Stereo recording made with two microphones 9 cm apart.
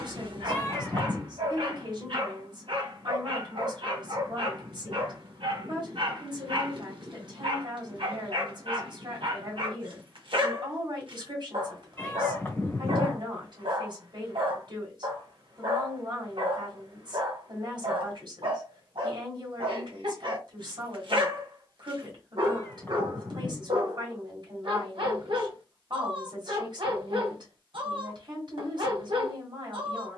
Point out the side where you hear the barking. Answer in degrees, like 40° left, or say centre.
70° right.